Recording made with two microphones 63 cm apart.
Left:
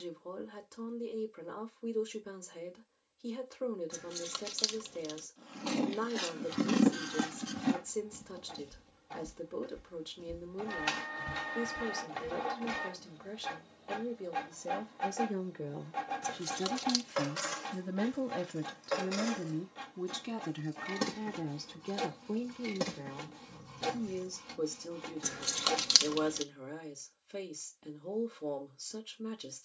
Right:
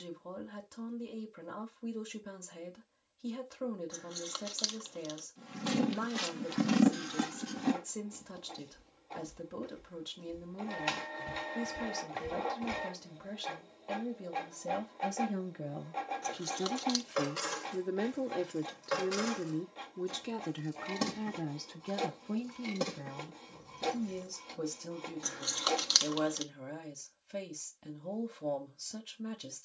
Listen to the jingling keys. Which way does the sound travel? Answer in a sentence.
In this clip you hear the jingling keys go right and come back.